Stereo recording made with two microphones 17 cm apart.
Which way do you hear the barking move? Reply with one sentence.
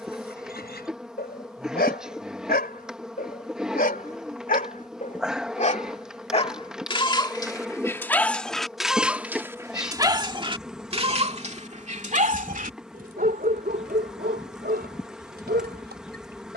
In this clip you hear the barking move from left to right.